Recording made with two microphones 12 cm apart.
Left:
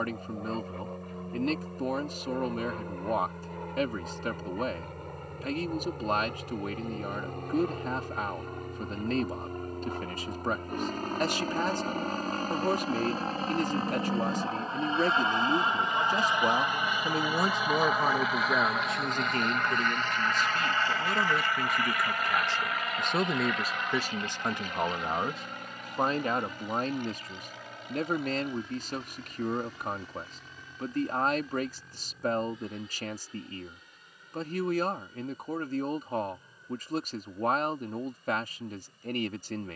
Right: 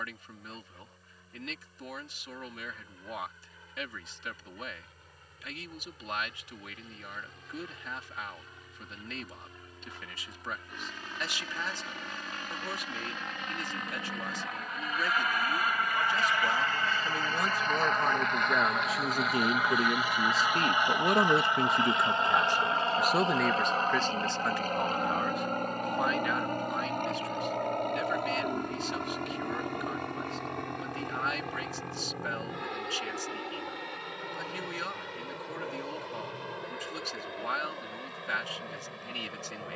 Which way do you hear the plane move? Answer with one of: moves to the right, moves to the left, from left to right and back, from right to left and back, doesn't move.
moves to the right.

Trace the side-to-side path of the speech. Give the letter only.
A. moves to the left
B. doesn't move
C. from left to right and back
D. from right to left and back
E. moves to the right
C.